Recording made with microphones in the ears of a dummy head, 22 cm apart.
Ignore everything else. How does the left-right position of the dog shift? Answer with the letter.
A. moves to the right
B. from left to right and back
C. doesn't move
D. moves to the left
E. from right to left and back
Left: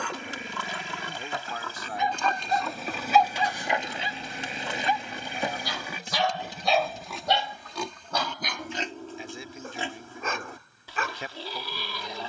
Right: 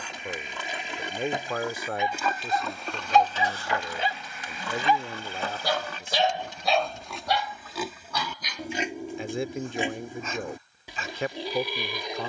B.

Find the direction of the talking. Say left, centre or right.
right.